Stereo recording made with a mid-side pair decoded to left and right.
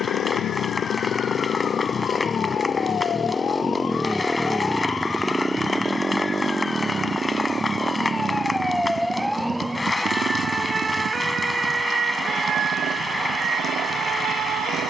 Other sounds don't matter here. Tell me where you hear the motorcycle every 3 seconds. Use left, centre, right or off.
left, centre, right, right, right.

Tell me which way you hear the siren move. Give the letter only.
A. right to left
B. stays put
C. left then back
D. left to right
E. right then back
D.